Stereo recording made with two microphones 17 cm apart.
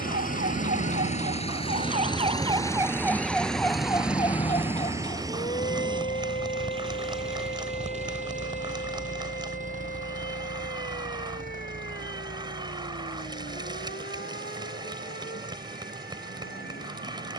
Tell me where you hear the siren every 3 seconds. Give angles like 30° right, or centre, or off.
50° right, 30° left, 60° left, 60° left, 70° left, 70° left.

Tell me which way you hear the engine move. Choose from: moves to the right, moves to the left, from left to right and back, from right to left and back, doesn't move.
moves to the right.